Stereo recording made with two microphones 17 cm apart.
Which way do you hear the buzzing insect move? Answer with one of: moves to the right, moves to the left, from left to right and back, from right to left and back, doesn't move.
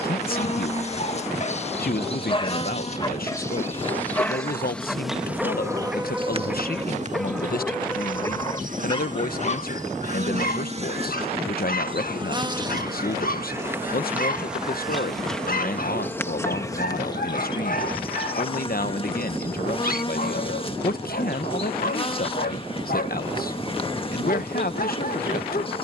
from left to right and back.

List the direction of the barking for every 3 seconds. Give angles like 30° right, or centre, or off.
40° left, 10° left, 10° left, 50° left, 60° left, 60° left, 60° left, 60° left, 60° left.